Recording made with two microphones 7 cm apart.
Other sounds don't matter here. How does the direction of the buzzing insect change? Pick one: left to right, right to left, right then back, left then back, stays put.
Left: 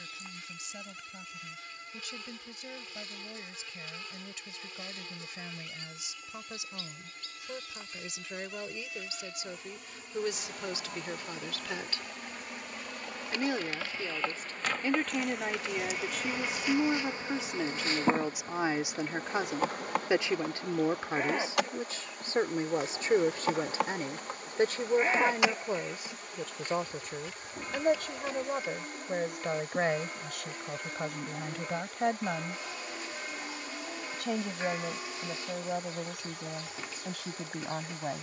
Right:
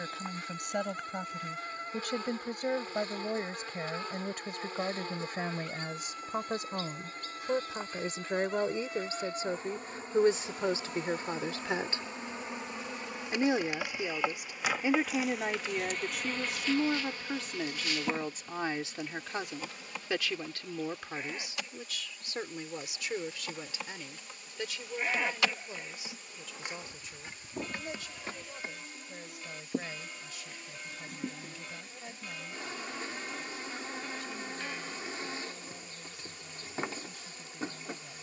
left then back.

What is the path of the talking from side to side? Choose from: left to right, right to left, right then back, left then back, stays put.
right to left.